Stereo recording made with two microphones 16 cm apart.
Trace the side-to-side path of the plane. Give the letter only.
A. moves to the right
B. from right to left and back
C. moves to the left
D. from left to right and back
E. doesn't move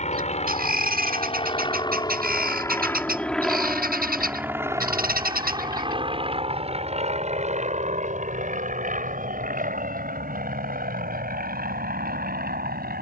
A.